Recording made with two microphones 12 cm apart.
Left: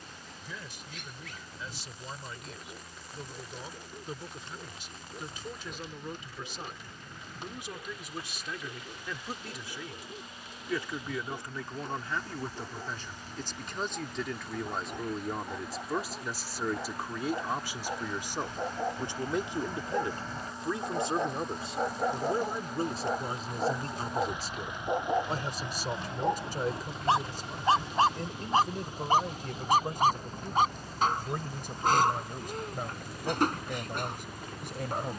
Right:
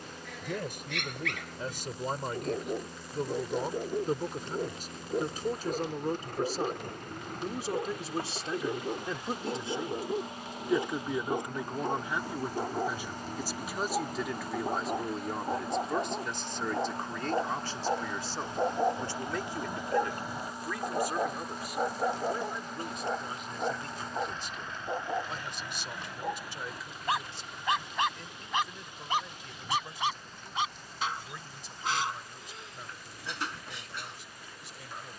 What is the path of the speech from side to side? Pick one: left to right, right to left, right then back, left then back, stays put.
right to left.